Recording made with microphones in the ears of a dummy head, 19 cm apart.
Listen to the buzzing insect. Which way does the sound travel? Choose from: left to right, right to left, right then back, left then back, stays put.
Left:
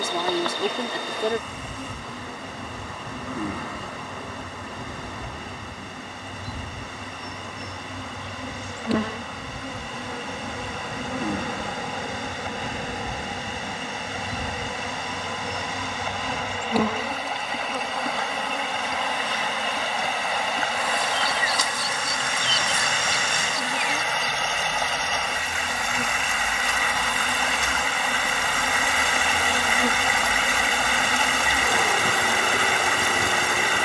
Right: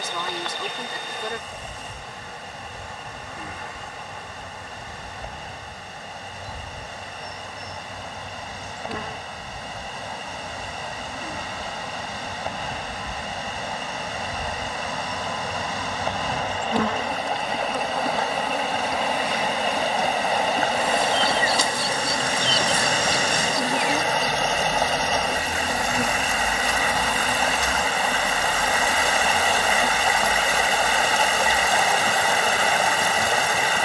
right then back.